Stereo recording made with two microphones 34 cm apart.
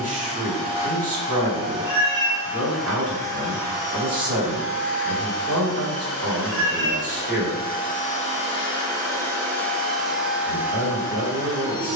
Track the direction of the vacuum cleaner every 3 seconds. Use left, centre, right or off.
centre, left, left, centre.